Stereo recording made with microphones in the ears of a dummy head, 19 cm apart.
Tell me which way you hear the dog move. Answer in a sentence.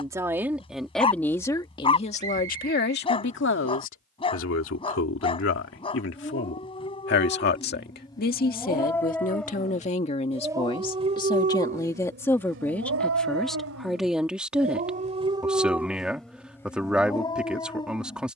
You can hear the dog move from left to right and back again.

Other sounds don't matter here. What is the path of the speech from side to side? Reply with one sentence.
You can hear the speech go left and come back.